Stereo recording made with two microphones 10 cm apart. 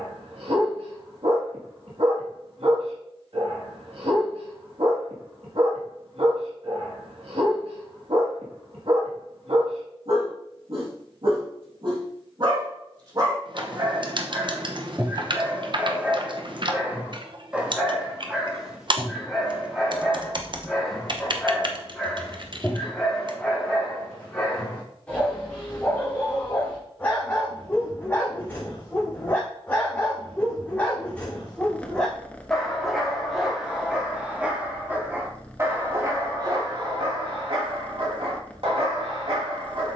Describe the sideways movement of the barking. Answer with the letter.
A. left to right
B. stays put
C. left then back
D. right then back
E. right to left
C.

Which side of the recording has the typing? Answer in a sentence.
You can hear the typing on the right.